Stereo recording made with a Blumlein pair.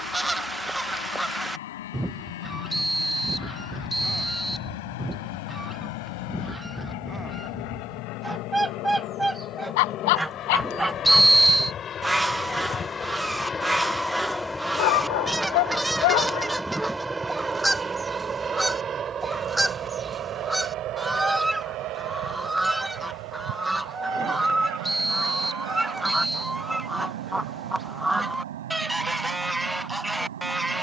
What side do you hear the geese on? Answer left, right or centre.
centre.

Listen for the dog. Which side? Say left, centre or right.
left.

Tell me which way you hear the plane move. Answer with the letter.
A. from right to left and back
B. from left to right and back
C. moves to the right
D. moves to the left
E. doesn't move
C.